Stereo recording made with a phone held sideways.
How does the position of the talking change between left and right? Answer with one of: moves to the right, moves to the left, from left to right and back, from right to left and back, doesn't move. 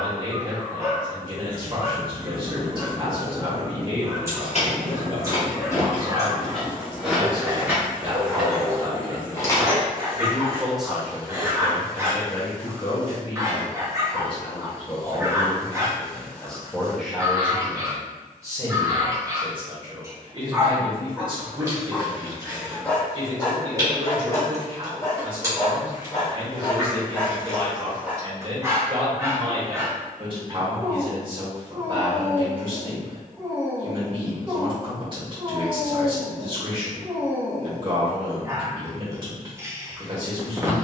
from right to left and back.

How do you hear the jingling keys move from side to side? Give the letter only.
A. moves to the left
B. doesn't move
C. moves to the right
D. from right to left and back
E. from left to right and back
E.